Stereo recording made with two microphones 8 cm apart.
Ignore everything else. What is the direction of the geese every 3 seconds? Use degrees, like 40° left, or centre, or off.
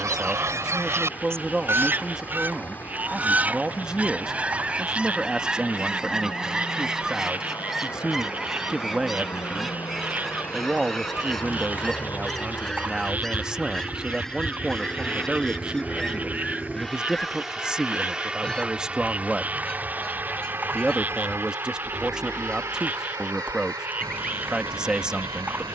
30° right, 10° right, centre, centre, 10° left, 10° left, 10° left, 10° left, 10° left.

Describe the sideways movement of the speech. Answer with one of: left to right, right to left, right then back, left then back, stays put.
stays put.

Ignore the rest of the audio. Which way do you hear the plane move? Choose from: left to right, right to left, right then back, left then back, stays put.
left to right.